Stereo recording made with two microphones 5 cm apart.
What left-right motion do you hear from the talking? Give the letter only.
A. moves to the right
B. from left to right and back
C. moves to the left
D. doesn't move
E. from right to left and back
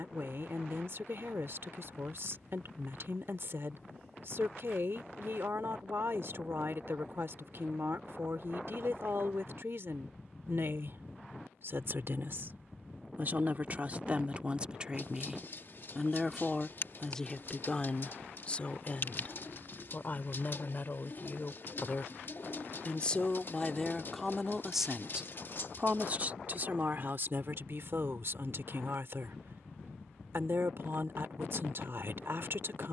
E.